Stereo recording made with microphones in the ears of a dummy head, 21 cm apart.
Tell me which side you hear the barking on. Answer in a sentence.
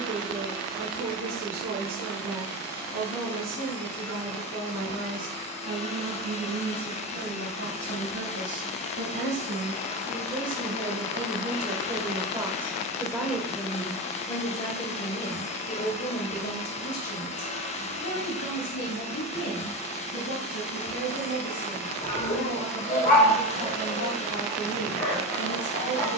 You can hear the barking on the left.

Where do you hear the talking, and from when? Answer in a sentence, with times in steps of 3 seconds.
You can hear the talking on the right from 0 s, in the centre from 12 s and on the left from 15 s.